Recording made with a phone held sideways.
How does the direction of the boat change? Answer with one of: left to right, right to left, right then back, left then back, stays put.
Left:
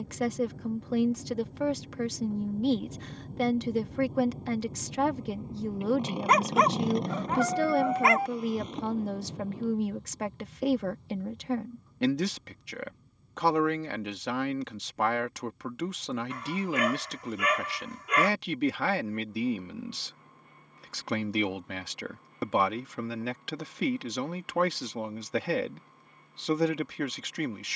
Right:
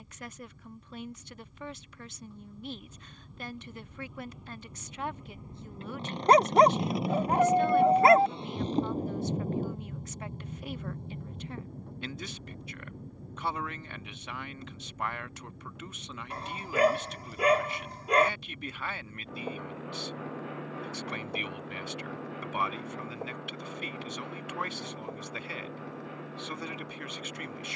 left to right.